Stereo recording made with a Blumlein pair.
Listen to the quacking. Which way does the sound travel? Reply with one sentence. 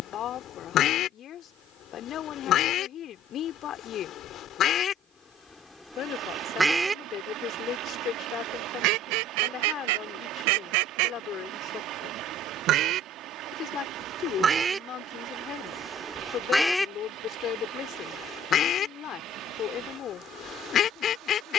In this clip you hear the quacking go right and come back.